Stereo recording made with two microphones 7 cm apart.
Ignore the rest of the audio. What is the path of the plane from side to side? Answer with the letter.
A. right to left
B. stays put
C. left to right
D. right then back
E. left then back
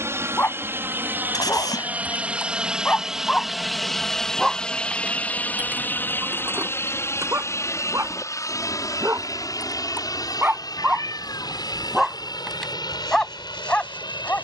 A.